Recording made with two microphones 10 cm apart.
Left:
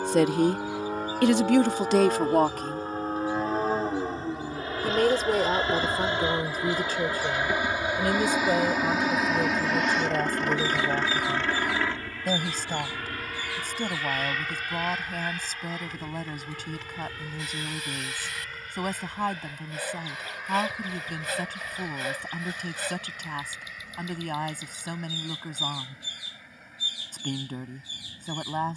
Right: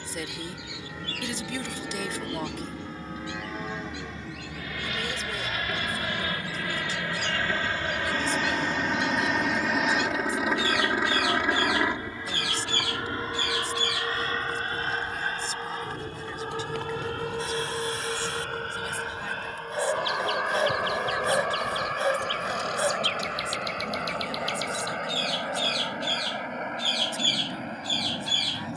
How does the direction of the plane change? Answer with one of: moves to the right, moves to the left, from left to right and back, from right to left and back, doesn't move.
moves to the right.